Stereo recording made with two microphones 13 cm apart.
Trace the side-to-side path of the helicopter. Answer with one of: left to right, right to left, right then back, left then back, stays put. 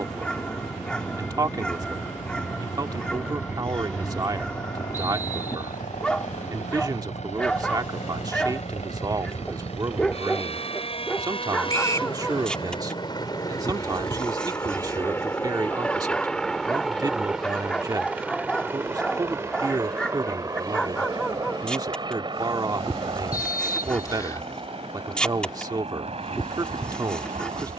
left to right.